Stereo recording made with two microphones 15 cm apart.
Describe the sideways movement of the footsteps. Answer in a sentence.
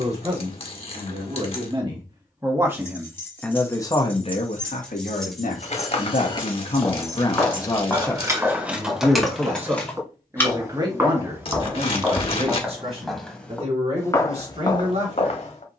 In this clip you hear the footsteps go right and come back.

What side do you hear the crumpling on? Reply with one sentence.
You can hear the crumpling on the left.